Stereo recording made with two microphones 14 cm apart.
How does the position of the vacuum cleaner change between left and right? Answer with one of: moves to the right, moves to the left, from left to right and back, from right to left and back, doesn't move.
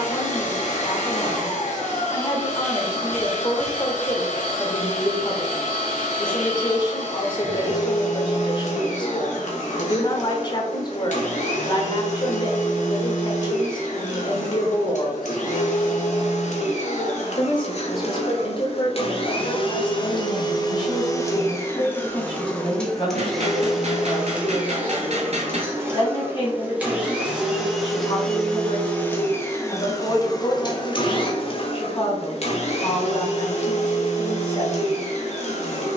from left to right and back.